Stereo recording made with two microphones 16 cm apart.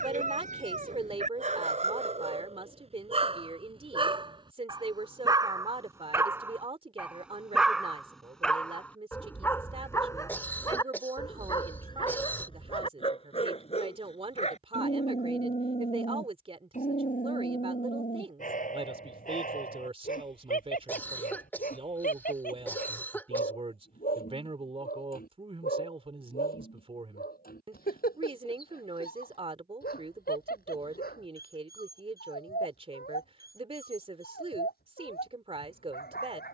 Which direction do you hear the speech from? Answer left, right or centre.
right.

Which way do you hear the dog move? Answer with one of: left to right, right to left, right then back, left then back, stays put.
right to left.